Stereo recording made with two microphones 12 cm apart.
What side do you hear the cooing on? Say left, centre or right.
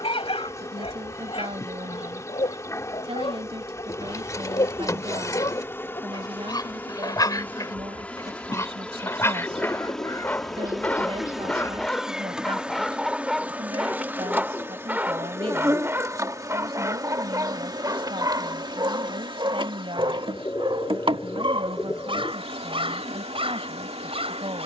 left.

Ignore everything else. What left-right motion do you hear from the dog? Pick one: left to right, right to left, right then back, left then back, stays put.
left to right.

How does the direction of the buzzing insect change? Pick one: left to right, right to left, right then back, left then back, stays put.
left to right.